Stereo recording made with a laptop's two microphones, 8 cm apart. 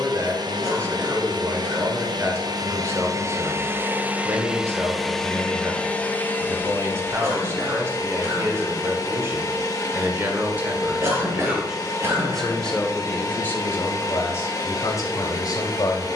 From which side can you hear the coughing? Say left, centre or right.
right.